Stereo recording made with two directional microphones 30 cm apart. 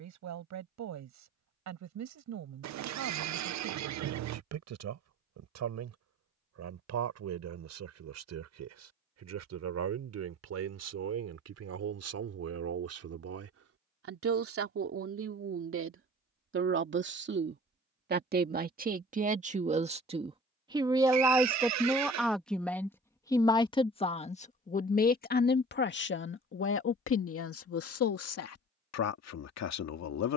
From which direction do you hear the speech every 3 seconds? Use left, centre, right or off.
right, right, right, right, right, right, right, centre, left, left.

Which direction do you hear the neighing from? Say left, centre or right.
right.